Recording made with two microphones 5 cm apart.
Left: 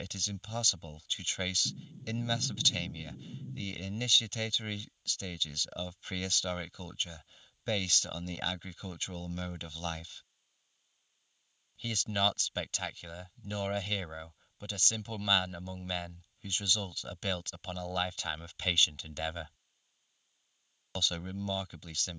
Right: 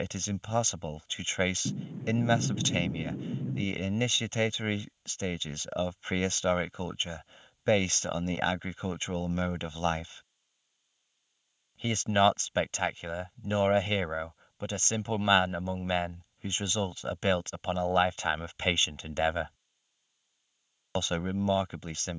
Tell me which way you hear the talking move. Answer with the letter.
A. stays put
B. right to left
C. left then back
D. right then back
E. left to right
A.